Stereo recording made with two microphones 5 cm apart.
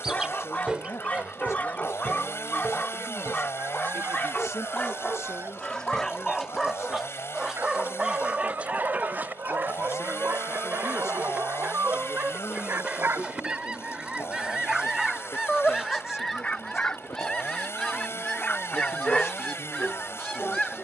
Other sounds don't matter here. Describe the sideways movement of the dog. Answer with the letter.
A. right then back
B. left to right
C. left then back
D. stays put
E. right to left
A.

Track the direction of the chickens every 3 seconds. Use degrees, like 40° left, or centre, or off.
30° right, 50° right, 40° right, 30° right, 20° right, centre, 10° left.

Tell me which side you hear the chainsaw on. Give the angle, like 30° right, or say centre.
60° left.